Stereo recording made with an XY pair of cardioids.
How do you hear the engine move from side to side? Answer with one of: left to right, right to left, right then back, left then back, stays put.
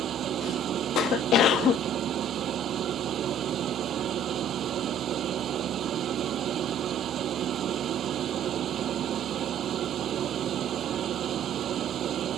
stays put.